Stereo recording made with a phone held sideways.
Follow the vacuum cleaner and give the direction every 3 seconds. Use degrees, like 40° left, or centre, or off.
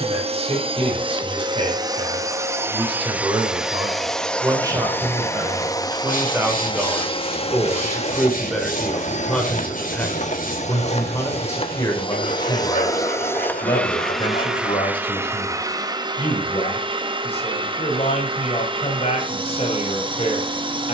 30° right, 10° left, 40° left, 50° left, 10° left, 30° right, 30° right.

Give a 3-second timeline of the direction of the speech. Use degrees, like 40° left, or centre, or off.
40° right, 20° right, 10° right, 10° left, 30° left, 40° left, 40° left.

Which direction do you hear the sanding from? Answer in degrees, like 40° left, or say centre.
60° left.